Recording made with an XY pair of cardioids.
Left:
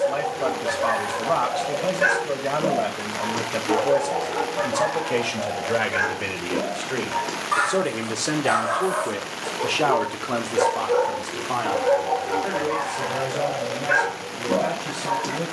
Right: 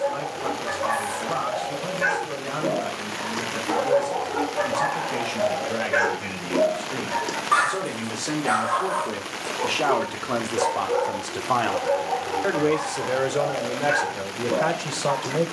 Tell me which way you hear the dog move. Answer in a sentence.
You can hear the dog move from left to right and back again.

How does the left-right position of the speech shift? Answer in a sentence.
In this clip you hear the speech move from left to right.